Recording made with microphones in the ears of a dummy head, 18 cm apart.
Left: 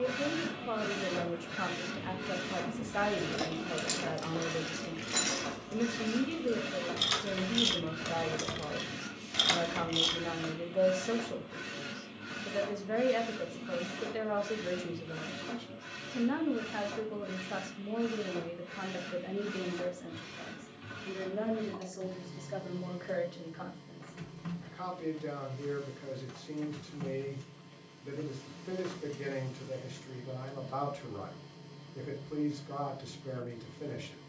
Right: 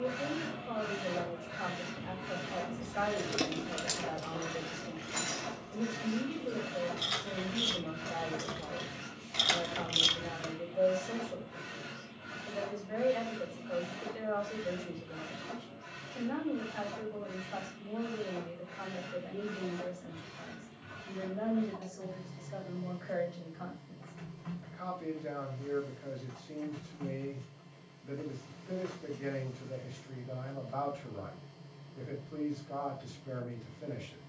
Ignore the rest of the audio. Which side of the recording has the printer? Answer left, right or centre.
left.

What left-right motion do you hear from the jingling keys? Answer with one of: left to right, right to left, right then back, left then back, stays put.
left then back.